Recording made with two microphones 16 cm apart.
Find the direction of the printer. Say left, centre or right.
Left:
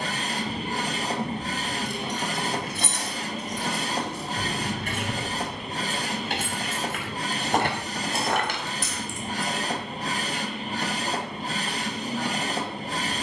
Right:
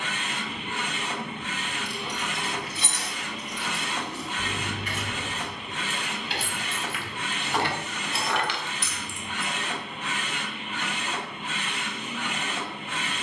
left.